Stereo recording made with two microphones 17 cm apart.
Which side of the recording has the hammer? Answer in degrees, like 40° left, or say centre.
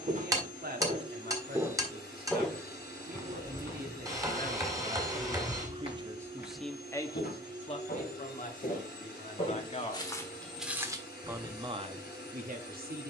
20° right.